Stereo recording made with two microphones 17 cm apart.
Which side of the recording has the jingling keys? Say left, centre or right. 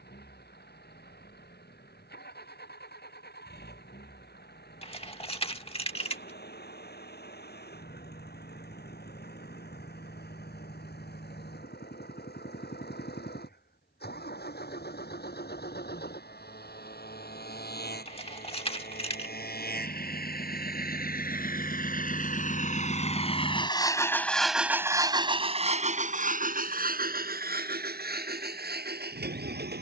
left.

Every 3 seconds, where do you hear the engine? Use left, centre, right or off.
left, left, left, left, left, left, left, left, right, right.